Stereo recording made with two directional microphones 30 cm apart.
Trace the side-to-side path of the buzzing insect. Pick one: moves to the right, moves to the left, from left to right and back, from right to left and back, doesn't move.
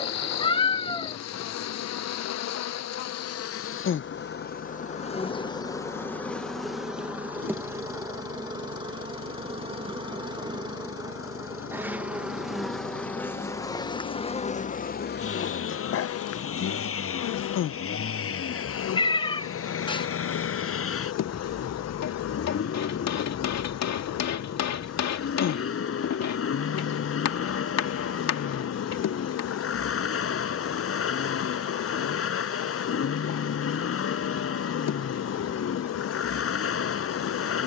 from left to right and back.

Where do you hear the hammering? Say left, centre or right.
left.